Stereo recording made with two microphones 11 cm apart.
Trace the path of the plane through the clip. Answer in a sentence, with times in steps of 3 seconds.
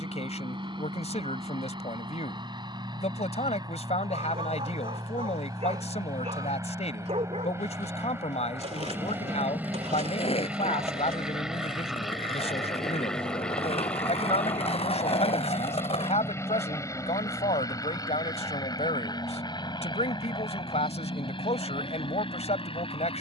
In this clip you hear the plane on the right from 0 s, in the centre from 9 s and on the left from 15 s.